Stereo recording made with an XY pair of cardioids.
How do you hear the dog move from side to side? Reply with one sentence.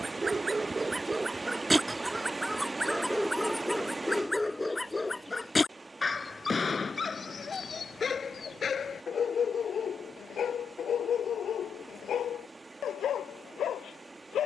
In this clip you hear the dog go from the right side to the left.